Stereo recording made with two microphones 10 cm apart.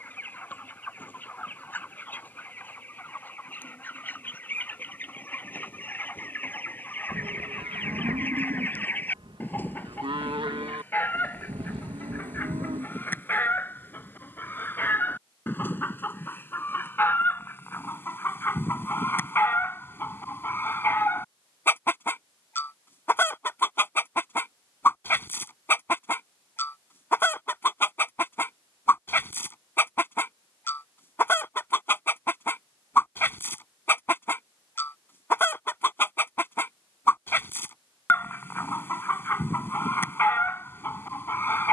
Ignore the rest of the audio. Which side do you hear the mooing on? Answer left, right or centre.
right.